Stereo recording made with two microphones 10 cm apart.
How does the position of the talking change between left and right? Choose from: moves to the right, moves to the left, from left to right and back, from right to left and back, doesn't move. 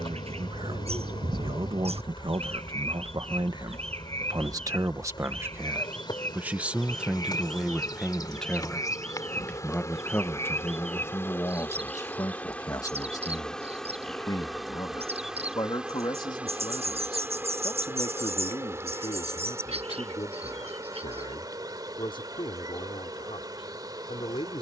moves to the left.